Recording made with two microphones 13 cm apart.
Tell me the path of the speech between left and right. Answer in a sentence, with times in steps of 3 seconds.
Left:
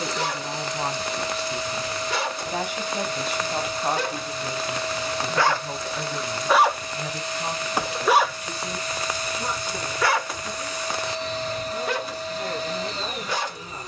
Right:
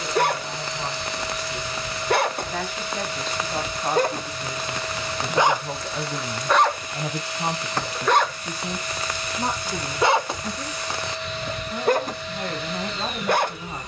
In this clip you hear the speech on the left from 0 s, in the centre from 3 s and on the right from 6 s.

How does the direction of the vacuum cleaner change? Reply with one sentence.
In this clip you hear the vacuum cleaner stay put.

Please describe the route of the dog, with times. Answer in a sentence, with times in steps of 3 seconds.
In this clip you hear the dog on the right from 0 s, in the centre from 6 s and on the right from 9 s.